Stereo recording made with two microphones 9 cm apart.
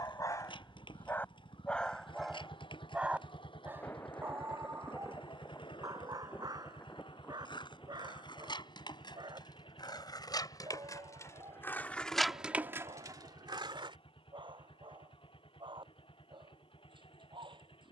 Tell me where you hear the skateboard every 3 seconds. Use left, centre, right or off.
left, left, left, left, right, off.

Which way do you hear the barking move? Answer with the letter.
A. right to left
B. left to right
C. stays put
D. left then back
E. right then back
B.